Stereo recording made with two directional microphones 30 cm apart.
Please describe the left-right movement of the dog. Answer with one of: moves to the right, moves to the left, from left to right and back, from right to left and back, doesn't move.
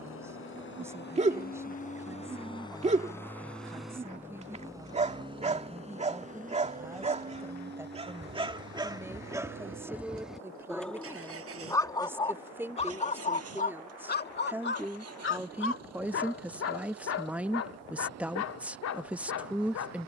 moves to the left.